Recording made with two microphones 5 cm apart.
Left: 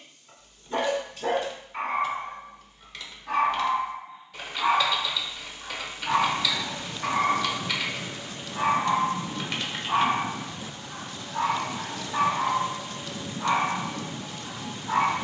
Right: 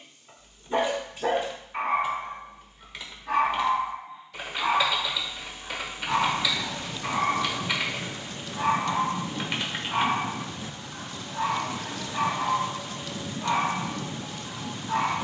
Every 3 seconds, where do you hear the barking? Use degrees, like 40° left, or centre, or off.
20° right, 10° left, 50° left, 70° left, 80° left.